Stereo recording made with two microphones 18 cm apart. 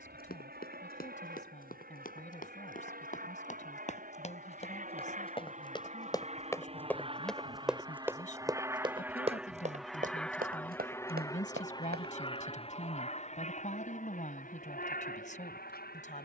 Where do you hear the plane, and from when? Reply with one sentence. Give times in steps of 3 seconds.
You can hear the plane on the right from 0 s, in the centre from 9 s and on the left from 12 s.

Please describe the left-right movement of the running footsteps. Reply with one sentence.
You can hear the running footsteps travel towards the right.